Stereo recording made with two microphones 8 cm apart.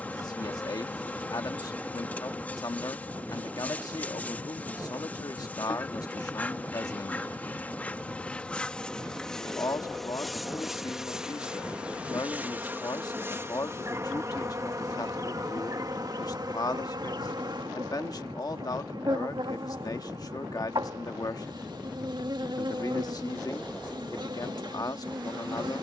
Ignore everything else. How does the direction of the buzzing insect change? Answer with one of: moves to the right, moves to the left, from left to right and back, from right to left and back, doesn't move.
moves to the right.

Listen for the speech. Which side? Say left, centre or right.
left.